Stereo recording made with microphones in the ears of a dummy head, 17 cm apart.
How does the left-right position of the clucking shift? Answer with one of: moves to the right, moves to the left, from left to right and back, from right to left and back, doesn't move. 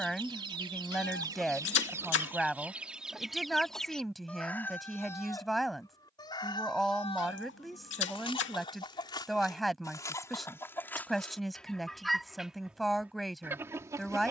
from right to left and back.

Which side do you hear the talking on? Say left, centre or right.
centre.